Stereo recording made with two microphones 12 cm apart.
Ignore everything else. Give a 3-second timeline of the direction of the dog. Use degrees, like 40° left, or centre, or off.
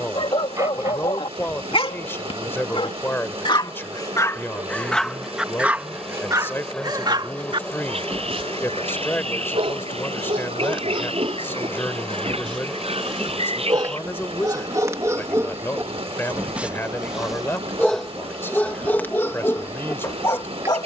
50° left, 20° left, 40° right, 50° right, 40° right, 10° right, 20° left.